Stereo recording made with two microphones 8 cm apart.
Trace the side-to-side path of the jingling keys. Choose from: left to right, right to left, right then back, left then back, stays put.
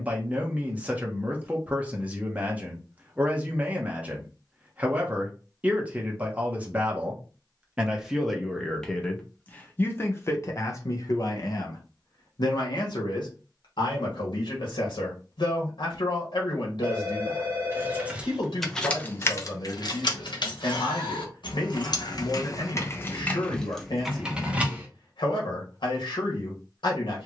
left then back.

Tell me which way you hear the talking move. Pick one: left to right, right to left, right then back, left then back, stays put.
right to left.